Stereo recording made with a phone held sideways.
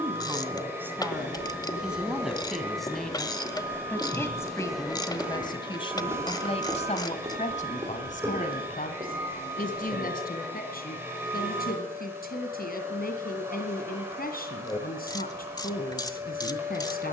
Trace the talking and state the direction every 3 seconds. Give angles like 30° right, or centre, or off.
10° right, 20° left, 50° left, 70° left, 70° left, 70° left.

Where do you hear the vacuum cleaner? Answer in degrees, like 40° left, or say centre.
10° right.